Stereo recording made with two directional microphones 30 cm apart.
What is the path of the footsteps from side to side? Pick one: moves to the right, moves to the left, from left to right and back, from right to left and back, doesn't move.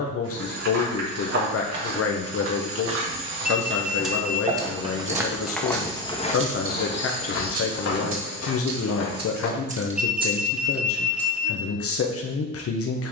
moves to the left.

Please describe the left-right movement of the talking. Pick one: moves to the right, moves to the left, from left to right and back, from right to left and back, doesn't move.
doesn't move.